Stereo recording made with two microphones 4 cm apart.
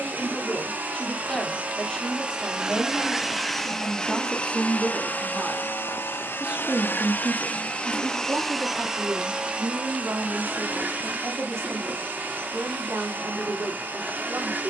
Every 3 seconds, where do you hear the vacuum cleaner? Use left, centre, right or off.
right, left, left, right, right.